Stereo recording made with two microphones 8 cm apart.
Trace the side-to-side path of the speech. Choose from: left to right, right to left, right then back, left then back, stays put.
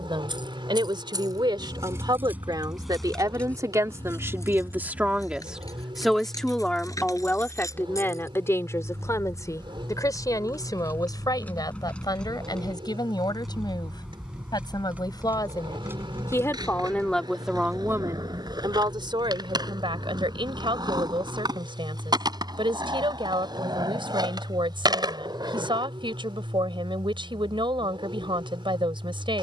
left then back.